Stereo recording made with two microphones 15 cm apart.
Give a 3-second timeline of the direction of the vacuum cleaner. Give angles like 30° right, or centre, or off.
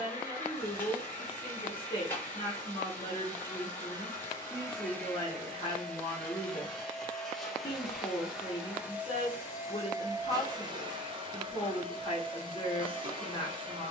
10° left, 10° left, centre, 30° right, 40° right.